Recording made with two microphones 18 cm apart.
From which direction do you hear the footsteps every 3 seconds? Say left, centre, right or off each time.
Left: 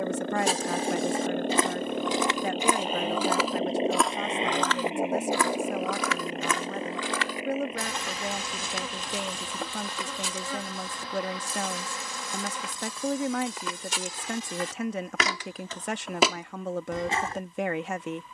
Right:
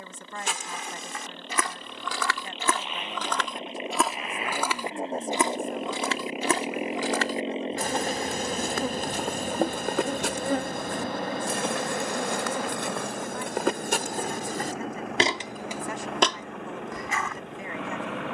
left, centre, right, right, right, centre.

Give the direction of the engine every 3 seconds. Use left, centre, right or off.
left, left, right, right, right, right.